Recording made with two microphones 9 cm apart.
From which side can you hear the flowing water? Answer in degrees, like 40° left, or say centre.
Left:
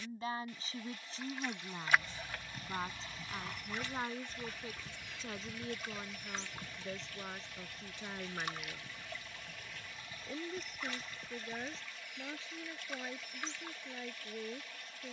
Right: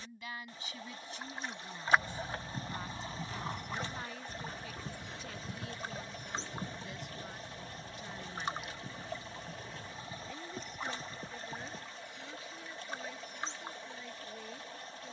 30° right.